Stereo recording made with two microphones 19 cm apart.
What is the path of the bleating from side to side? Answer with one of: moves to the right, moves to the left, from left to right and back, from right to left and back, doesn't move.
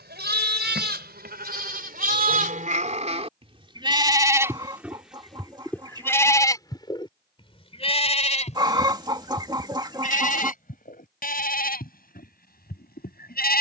moves to the left.